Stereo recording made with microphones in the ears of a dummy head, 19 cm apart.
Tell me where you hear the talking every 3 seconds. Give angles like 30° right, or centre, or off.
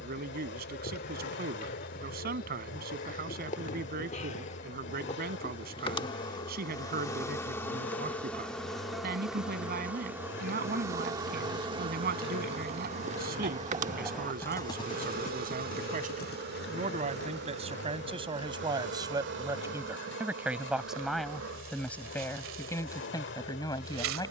50° right, 50° right, 50° right, 50° right, 50° right, 40° right, 20° right, 10° left.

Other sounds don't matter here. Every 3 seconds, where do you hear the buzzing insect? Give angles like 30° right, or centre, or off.
50° left, 30° left, 10° left, 10° right, 30° right, 50° right, 60° right, 70° right.